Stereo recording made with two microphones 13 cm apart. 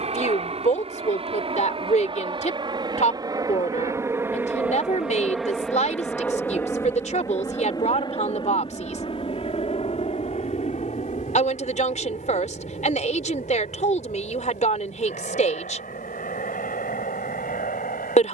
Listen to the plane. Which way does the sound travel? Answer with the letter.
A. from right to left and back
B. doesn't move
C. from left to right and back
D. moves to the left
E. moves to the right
D.